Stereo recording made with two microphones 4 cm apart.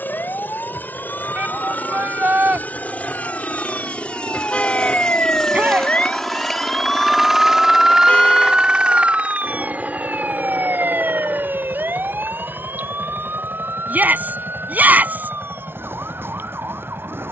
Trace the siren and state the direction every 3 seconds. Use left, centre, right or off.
left, left, centre, right, right, right.